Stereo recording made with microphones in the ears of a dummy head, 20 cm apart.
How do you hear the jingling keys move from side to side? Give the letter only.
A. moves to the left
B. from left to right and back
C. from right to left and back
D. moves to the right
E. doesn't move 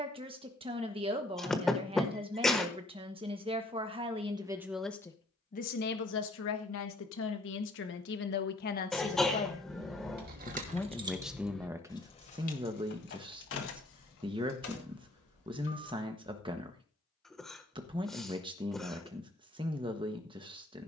A.